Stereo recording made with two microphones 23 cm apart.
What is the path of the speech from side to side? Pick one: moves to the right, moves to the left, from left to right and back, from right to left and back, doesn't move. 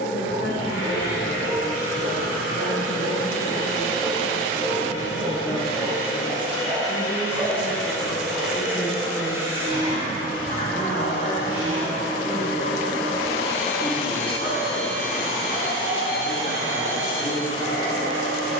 from left to right and back.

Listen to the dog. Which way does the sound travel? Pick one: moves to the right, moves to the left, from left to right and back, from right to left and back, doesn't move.
moves to the left.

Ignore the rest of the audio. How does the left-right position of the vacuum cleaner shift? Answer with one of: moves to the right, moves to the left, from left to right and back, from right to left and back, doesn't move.
moves to the right.